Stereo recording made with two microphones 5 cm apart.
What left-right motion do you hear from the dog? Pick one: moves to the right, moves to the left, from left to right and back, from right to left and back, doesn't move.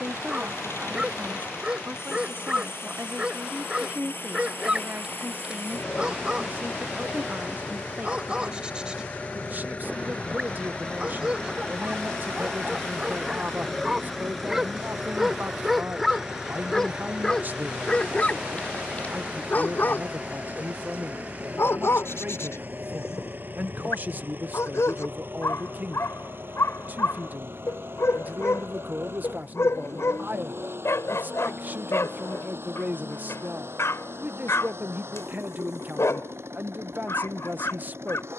moves to the left.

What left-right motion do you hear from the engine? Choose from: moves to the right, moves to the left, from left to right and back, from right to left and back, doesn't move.
moves to the right.